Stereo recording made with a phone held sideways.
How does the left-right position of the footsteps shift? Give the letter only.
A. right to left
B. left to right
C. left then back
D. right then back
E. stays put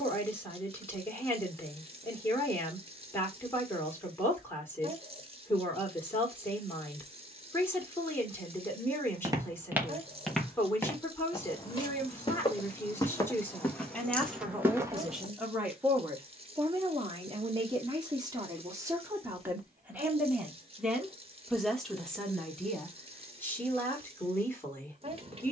C.